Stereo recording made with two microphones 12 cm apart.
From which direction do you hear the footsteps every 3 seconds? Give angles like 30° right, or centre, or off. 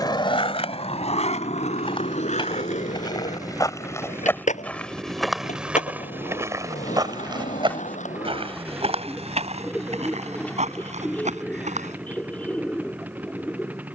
40° left, 10° left, 40° right, 60° right, off.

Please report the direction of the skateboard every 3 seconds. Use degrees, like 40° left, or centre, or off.
60° left, 70° left, 80° left, off, off.